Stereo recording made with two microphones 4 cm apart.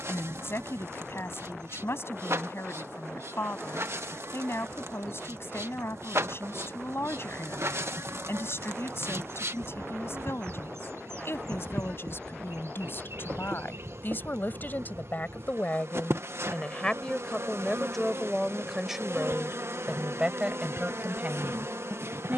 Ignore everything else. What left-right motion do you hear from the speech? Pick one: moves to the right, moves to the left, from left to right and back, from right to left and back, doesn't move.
moves to the right.